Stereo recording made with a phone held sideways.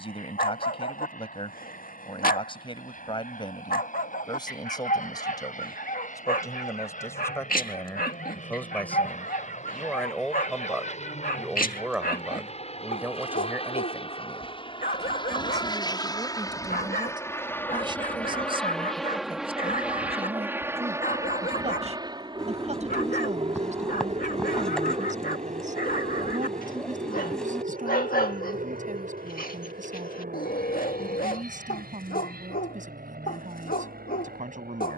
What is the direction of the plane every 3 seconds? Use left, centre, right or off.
left, left, left, left, left, left, centre, right, right, right, right, right.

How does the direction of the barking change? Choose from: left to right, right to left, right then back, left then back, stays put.
stays put.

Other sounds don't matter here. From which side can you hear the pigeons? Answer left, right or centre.
centre.